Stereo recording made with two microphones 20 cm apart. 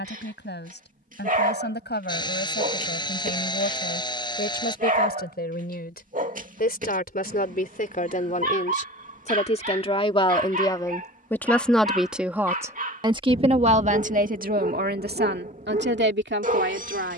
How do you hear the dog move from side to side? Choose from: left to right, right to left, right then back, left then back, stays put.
stays put.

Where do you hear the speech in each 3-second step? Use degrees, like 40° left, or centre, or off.
60° left, 50° left, 40° left, 20° left, 30° right, 60° right.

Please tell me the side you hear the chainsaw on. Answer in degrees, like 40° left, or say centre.
20° left.